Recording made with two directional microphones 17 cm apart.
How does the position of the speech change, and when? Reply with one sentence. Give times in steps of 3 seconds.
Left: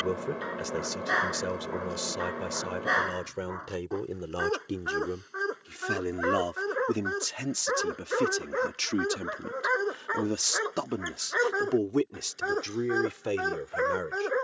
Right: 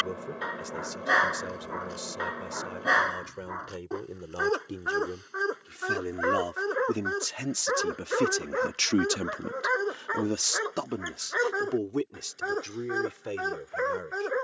In this clip you hear the speech on the left from 0 s, in the centre from 6 s and on the left from 12 s.